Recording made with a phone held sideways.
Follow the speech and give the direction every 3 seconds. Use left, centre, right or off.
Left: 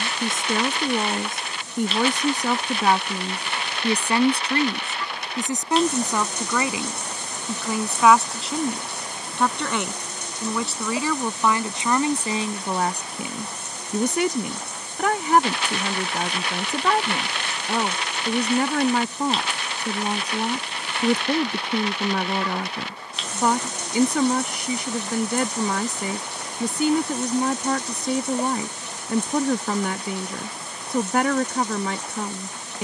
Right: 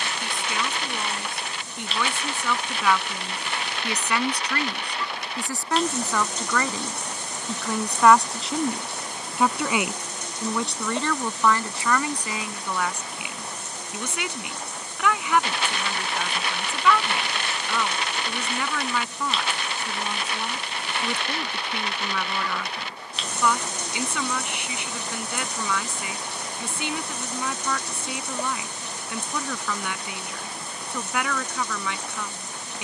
left, left, centre, centre, left, left, left, left, left, left, left.